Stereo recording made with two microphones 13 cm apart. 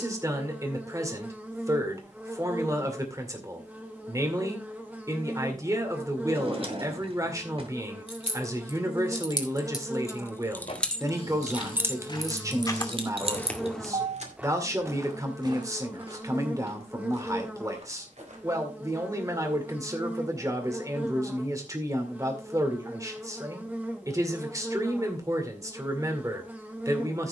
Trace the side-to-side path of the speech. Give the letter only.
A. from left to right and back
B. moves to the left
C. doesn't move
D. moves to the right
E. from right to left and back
C.